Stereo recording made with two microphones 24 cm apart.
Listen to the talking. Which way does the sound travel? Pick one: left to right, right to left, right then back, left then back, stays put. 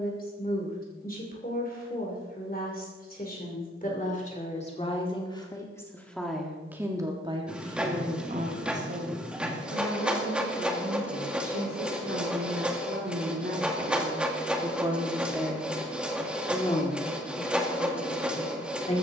right then back.